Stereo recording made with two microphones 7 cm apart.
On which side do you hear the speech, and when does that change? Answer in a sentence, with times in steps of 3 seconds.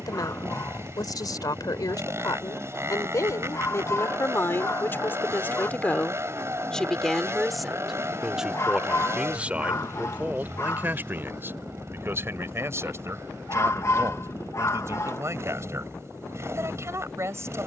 You can hear the speech on the left from 0 s, in the centre from 6 s and on the right from 9 s.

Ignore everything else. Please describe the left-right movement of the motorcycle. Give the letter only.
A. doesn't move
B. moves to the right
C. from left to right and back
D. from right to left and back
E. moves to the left
A.